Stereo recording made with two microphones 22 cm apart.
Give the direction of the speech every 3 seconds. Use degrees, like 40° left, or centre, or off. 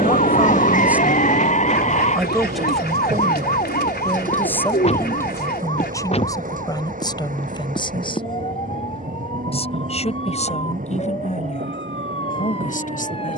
centre, 10° left, 20° left, 30° left, 40° left.